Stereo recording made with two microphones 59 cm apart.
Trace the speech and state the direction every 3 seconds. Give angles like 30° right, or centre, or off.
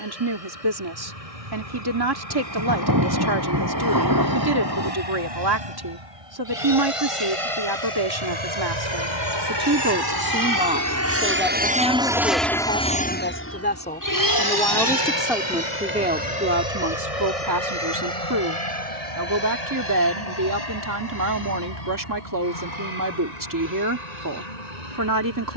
40° right, 40° right, 40° right, 10° right, 10° left, 20° right, 30° right, 30° right, 30° right.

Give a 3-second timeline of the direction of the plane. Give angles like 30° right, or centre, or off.
80° right, 70° right, 60° right, 30° right, 20° left, 50° left, 60° left, 70° left, 70° left.